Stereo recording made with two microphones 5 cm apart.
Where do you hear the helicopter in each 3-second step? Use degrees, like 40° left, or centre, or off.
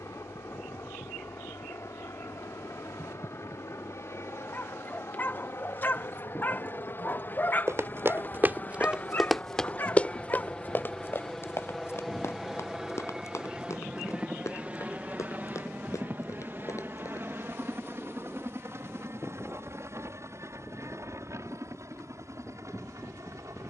60° left, 60° left, 40° left, 20° left, 10° right, 40° right, 50° right, 60° right.